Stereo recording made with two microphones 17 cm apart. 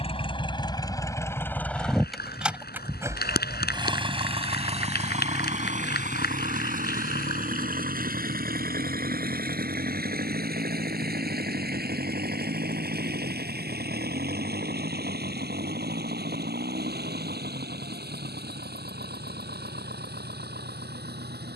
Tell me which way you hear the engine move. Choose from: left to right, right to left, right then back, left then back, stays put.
left to right.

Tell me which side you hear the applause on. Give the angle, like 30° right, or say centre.
80° left.